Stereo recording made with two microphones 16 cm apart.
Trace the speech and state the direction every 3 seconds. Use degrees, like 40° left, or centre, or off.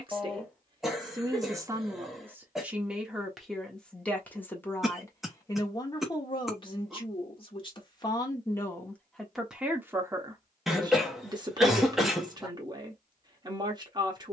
20° right, 10° left, 30° left, 20° right, 30° right.